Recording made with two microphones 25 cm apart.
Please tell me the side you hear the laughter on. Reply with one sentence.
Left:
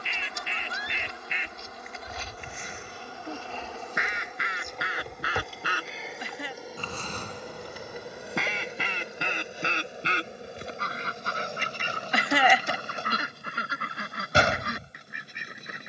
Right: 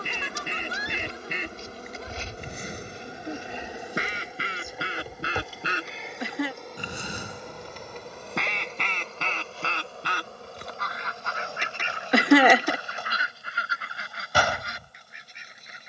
You can hear the laughter on the right.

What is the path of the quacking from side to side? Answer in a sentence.
You can hear the quacking move to the left.